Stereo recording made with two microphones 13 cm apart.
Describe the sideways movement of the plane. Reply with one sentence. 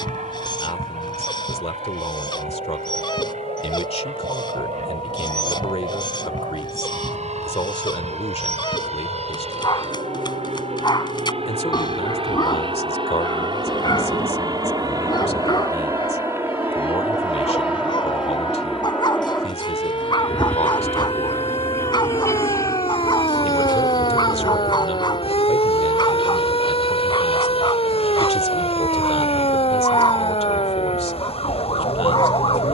You can hear the plane move to the left.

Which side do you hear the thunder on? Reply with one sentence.
You can hear the thunder on the left.